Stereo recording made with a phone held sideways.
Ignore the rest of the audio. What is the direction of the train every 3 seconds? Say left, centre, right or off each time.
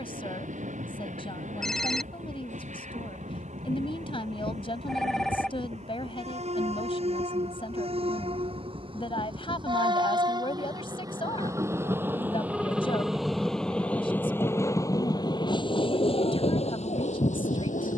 right, right, right, right, centre, left.